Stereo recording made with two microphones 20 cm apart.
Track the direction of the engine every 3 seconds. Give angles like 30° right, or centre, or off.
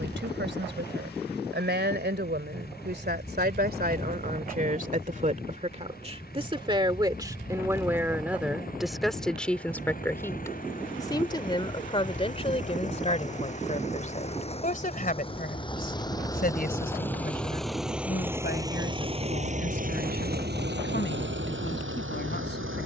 50° left, 50° left, 50° left, 40° left, 40° left, 10° left, 40° right, 70° right.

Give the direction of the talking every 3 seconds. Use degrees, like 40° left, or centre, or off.
60° right, 40° right, 20° right, 10° left, 30° left, 50° left, 50° left, 60° left.